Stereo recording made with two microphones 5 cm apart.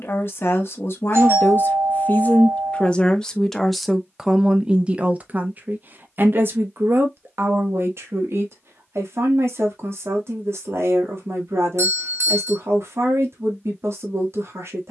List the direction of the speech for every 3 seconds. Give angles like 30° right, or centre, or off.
40° left, 10° right, 50° right, 60° right, 60° right.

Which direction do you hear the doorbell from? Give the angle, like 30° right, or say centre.
60° right.